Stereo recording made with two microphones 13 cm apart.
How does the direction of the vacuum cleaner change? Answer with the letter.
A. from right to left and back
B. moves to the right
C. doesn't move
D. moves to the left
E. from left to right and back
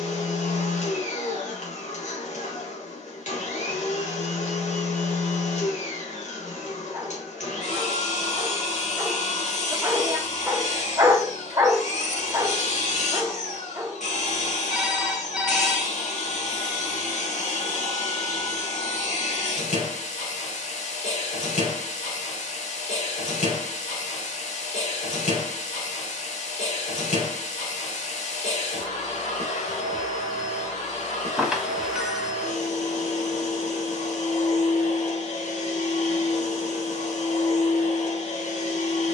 C.